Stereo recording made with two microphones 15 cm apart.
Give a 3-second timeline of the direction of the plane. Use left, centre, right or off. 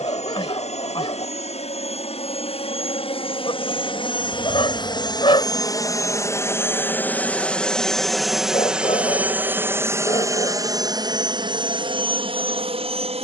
left, left, centre, right, right.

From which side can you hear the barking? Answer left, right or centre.
left.